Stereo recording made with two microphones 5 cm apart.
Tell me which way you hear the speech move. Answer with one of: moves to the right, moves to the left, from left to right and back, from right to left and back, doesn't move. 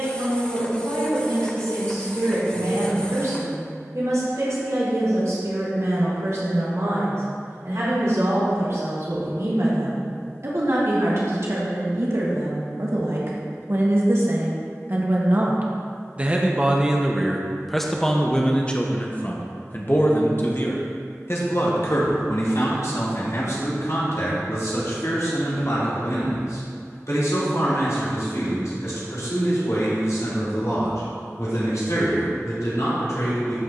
moves to the left.